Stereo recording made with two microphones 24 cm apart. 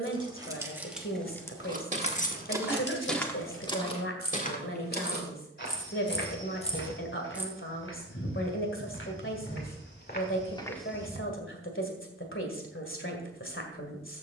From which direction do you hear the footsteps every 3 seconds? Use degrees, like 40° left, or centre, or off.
20° right, 30° left, 60° left, 30° left, off.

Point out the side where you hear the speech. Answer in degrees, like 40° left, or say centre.
60° left.